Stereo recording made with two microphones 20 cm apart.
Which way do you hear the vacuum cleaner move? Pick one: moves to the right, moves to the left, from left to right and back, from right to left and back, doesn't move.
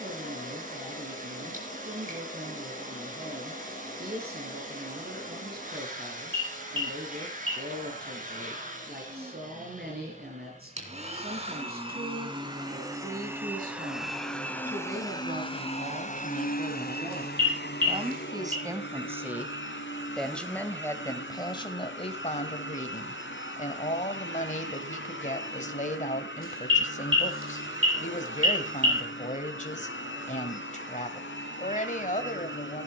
moves to the left.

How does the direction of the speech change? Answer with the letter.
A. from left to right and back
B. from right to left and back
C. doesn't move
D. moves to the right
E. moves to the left
E.